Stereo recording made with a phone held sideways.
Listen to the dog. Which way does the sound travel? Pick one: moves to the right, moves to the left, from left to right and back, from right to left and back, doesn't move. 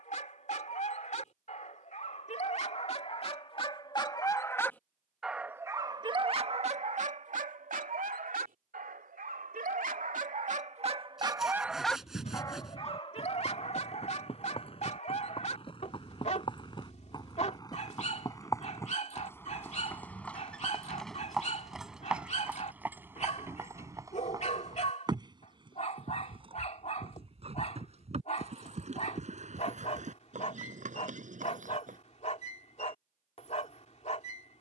from left to right and back.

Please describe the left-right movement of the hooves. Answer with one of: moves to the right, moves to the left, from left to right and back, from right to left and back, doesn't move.
moves to the right.